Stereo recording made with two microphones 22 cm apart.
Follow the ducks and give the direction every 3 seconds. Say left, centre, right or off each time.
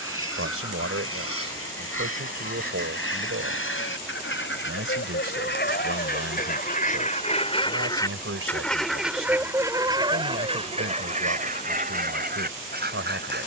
left, left, left, right, right.